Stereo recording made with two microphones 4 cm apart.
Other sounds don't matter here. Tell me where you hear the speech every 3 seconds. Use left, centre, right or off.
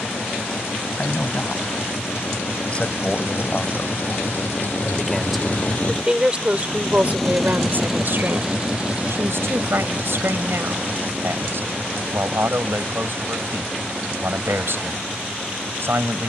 left, centre, right, right, right, right.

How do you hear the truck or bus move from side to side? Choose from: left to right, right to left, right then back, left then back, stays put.
left to right.